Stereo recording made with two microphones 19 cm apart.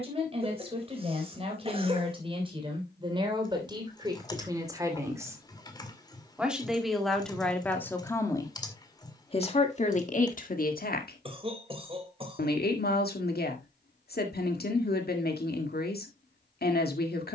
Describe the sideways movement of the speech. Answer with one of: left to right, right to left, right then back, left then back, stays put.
right to left.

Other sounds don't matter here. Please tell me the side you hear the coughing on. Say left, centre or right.
right.